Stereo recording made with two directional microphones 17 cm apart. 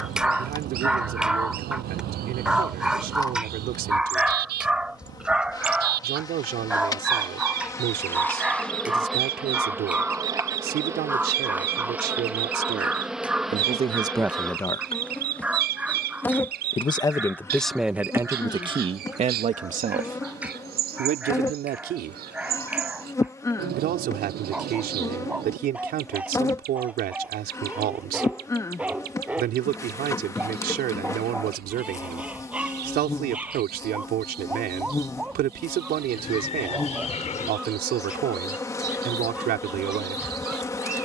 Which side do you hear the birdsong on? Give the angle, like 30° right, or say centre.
70° right.